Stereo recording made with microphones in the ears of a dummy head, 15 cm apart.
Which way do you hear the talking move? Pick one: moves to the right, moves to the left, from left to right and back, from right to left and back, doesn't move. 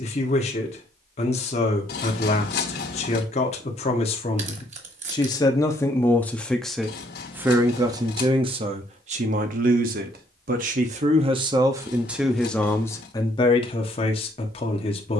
from left to right and back.